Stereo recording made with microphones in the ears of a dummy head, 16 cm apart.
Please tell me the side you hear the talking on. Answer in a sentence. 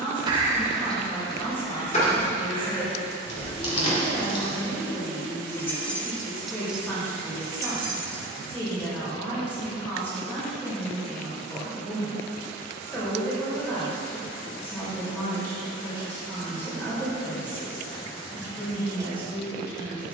You can hear the talking in the centre.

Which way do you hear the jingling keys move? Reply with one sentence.
In this clip you hear the jingling keys move from right to left and back again.